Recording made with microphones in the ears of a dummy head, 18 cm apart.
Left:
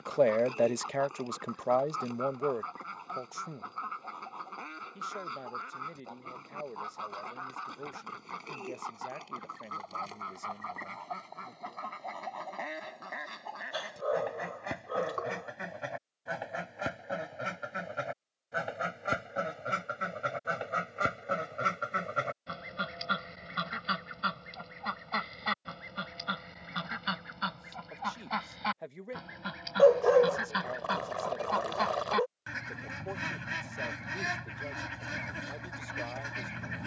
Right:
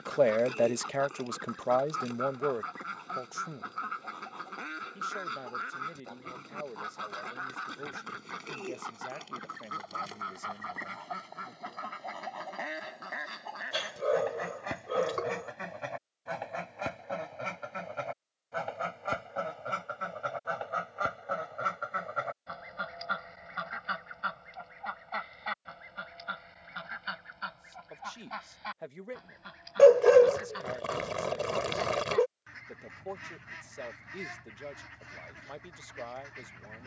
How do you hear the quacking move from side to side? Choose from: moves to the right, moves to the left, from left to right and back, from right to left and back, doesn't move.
moves to the left.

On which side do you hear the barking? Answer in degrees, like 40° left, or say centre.
30° right.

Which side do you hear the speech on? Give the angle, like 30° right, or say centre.
centre.